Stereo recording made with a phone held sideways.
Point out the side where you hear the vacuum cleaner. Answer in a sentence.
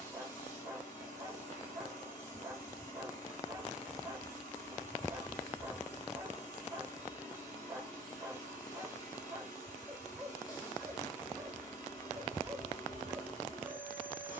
You can hear the vacuum cleaner on the left.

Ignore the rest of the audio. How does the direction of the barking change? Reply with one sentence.
In this clip you hear the barking stay in one place.